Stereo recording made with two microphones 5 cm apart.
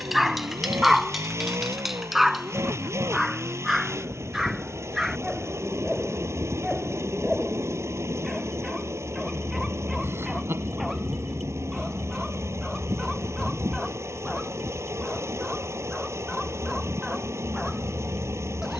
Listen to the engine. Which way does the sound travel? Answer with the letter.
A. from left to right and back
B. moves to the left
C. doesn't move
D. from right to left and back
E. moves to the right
C.